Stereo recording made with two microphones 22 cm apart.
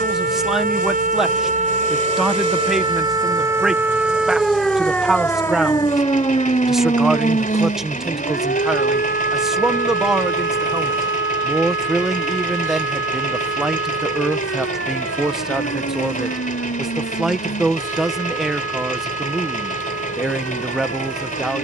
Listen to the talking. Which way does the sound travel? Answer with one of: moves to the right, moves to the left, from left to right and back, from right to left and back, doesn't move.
doesn't move.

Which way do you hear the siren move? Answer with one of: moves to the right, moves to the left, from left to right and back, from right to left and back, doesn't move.
moves to the left.